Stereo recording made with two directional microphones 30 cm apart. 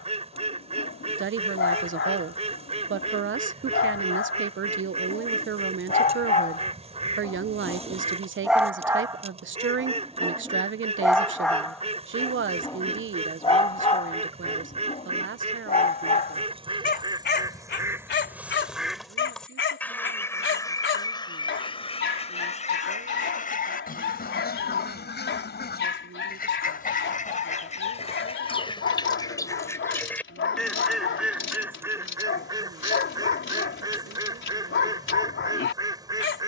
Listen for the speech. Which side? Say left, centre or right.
right.